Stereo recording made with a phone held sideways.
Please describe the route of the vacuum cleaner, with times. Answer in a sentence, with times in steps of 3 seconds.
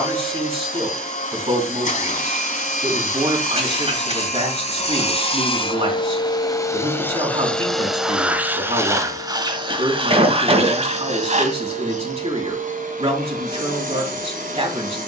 In this clip you hear the vacuum cleaner on the left from 0 s, in the centre from 6 s and on the right from 9 s.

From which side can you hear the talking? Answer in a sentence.
You can hear the talking on the right.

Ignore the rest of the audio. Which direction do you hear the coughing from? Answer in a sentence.
In this clip you hear the coughing on the right.